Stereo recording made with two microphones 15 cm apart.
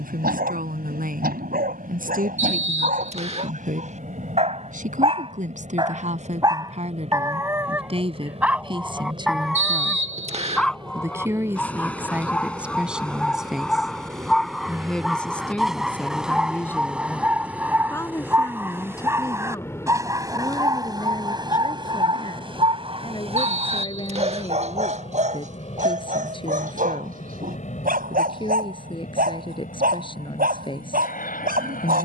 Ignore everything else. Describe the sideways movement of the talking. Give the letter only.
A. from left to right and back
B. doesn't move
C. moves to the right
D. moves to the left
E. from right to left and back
D.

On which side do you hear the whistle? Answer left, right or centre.
right.